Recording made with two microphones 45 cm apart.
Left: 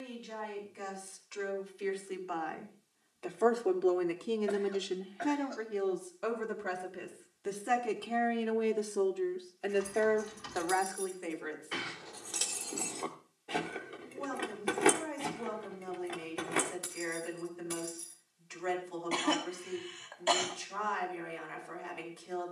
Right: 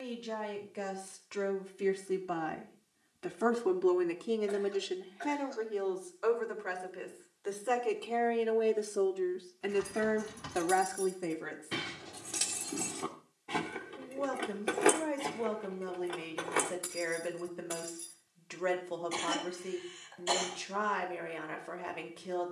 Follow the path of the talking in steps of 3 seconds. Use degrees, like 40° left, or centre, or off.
60° right, 10° left, 30° left, 30° right, 70° right, 70° right, 70° right, 70° right.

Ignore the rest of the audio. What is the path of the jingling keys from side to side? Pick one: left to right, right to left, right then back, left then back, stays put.
right to left.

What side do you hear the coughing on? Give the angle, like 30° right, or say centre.
70° left.